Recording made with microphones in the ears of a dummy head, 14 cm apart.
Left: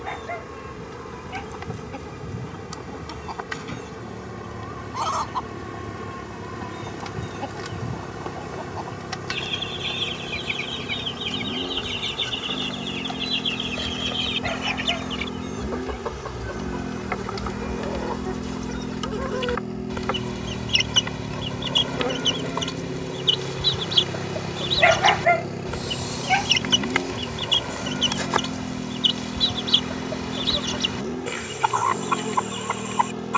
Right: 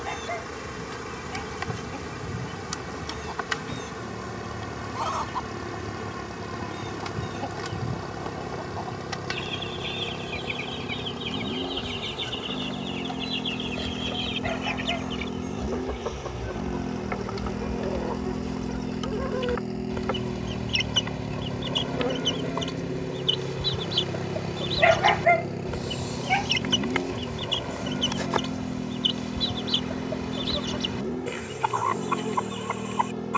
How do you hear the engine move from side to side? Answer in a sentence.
You can hear the engine go from the right side to the left.